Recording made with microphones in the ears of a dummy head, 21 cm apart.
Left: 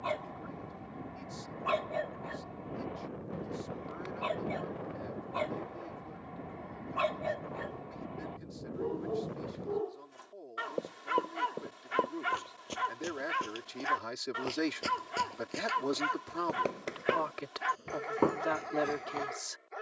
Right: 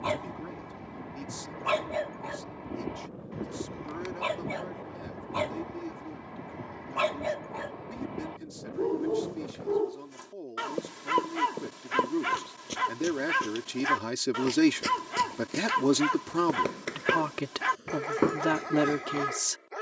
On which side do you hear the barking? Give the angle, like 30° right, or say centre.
60° right.